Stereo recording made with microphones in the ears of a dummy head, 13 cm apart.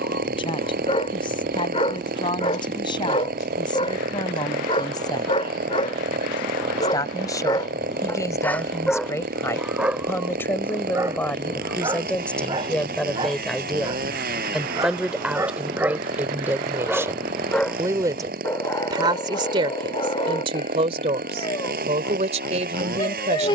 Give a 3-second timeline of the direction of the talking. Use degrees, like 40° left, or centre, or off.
40° left, 30° left, 30° left, 20° left, centre, 10° right, 40° right, 50° right.